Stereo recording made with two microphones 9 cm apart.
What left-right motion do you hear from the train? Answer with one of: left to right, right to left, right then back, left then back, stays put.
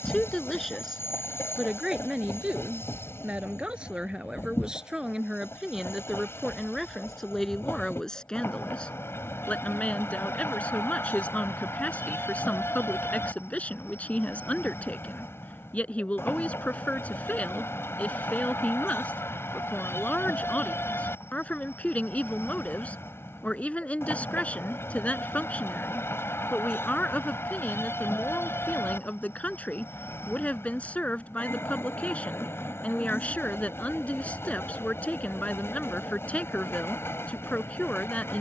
stays put.